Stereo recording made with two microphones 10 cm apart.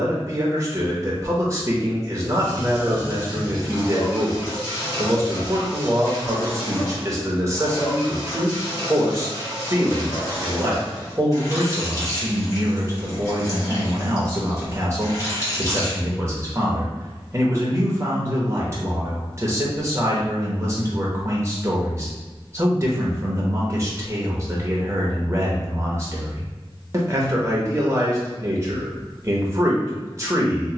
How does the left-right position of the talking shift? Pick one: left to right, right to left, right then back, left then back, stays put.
stays put.